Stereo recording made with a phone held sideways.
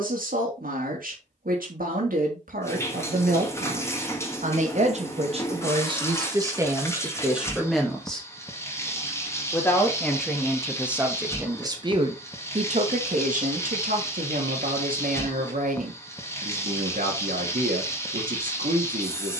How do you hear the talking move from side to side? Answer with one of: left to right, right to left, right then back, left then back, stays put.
left then back.